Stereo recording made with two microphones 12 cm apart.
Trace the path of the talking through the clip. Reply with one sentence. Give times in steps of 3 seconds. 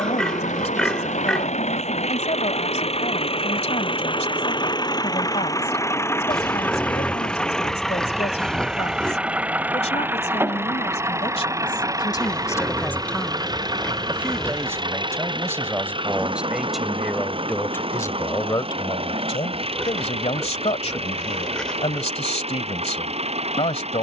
In this clip you hear the talking on the left from 0 s, in the centre from 12 s and on the left from 18 s.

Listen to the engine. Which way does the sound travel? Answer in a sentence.
In this clip you hear the engine move to the right.